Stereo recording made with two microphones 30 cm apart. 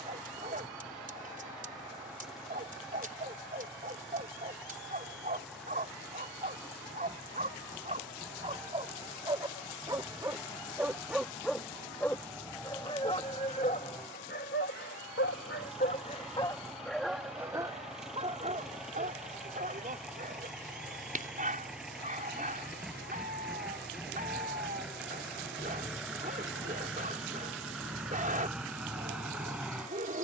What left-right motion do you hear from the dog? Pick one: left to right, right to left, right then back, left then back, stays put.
left then back.